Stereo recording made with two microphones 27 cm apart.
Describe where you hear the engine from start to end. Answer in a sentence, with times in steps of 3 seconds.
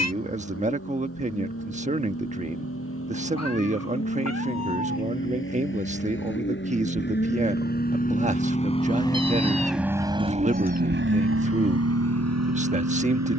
In this clip you hear the engine on the left from 0 s and on the right from 9 s.